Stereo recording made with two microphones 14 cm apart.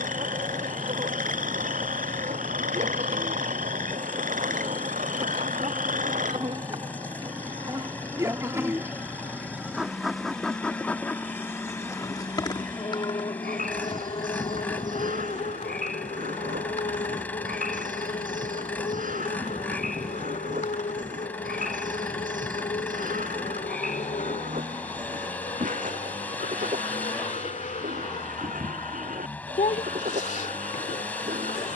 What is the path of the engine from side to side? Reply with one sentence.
In this clip you hear the engine stay put.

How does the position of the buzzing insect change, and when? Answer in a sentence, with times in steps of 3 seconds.
In this clip you hear the buzzing insect on the right from 0 s, in the centre from 9 s and on the left from 12 s.